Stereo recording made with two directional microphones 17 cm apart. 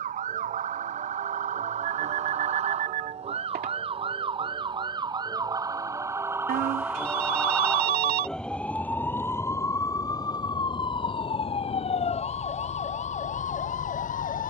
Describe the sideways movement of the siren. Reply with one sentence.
You can hear the siren move from right to left.